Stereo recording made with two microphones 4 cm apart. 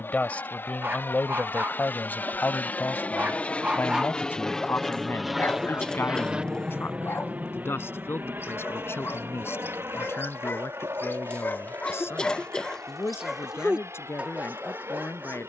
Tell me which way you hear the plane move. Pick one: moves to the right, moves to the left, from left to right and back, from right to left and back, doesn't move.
moves to the right.